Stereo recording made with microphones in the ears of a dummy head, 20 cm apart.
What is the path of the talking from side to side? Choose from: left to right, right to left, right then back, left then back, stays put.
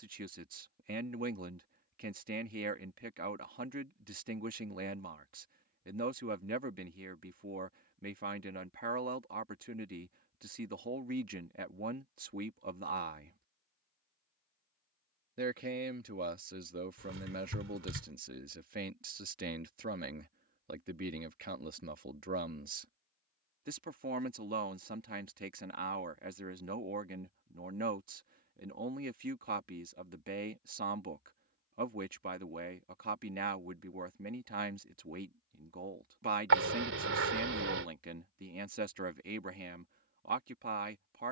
stays put.